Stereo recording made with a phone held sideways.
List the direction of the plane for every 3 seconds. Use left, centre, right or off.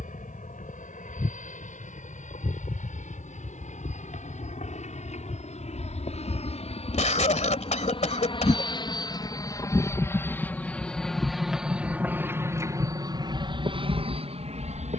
left, left, left, centre, right.